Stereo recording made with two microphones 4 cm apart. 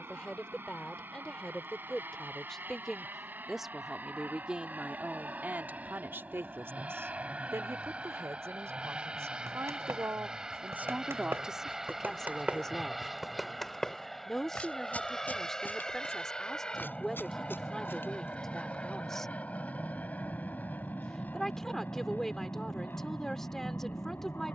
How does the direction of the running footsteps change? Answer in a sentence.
In this clip you hear the running footsteps move to the left.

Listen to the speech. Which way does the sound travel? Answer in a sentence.
In this clip you hear the speech go right and come back.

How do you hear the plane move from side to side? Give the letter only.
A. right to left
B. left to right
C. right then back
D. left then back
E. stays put
A.